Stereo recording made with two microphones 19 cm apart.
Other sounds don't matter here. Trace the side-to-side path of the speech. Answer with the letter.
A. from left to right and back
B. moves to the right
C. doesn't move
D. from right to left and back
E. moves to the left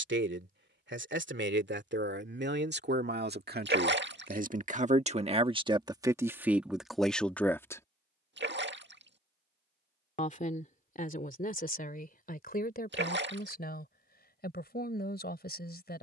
E.